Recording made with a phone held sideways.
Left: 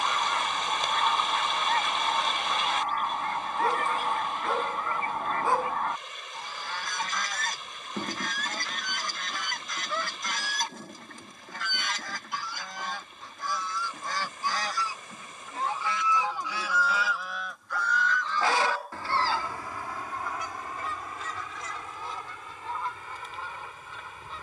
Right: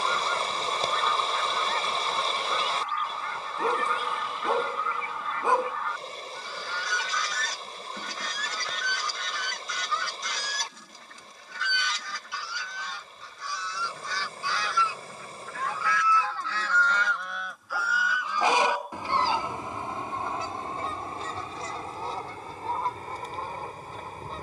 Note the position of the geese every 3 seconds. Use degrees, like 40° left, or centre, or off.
50° left, 50° left, 50° left, 50° left, 50° left, 10° left, 20° right, 40° right.